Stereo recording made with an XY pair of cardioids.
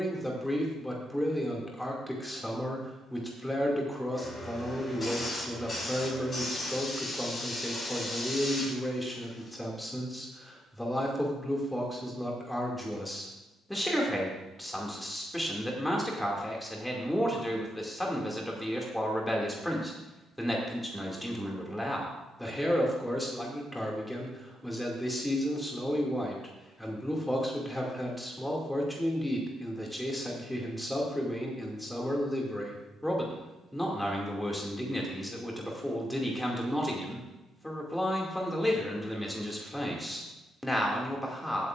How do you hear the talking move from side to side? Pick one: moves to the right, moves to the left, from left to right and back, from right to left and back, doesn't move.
doesn't move.